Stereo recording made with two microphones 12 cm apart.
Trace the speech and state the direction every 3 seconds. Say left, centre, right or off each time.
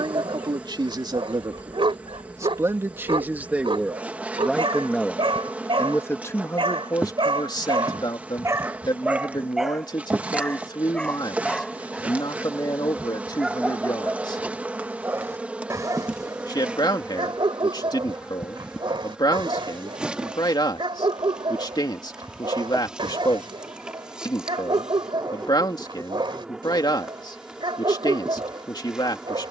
right, centre, left, left, left, left, left, left, left, left.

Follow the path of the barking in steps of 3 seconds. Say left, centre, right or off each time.
right, right, right, centre, centre, right, right, right, right, right.